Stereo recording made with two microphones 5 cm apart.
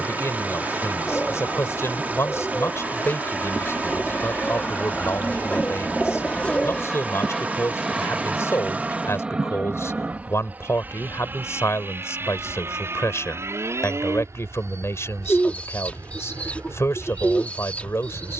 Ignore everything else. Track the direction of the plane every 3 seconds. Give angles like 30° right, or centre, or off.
50° left, 30° left, centre, 30° right, 50° right, 60° right.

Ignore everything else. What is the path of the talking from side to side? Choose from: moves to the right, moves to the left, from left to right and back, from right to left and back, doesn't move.
doesn't move.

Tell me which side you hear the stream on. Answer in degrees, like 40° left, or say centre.
30° right.